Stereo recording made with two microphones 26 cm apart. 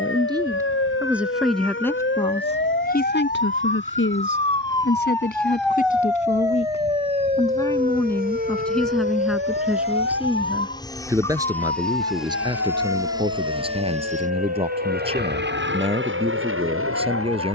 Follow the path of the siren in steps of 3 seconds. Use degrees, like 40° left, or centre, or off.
50° left, 20° left, 30° right, 50° right, 70° right, 70° right.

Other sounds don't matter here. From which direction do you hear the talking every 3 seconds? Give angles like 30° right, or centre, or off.
centre, 50° left, 10° left, 10° right, 20° right, 20° right.